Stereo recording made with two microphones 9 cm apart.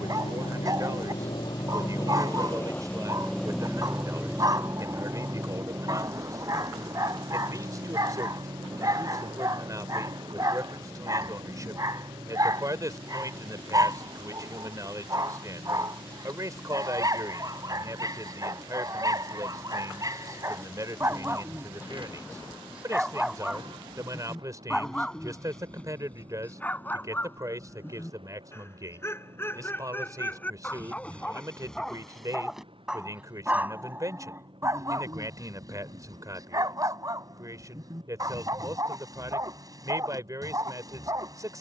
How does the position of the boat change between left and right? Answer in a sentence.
You can hear the boat go from the left side to the right.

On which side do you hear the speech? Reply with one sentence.
You can hear the speech on the right.